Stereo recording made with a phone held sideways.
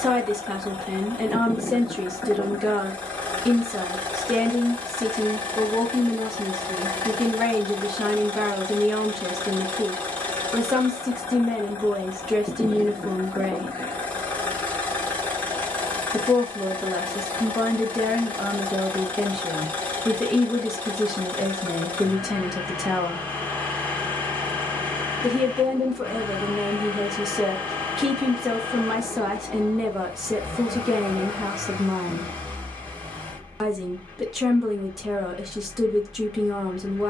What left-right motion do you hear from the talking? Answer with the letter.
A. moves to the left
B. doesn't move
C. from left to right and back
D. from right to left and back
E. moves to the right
B.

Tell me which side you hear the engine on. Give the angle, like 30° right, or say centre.
10° left.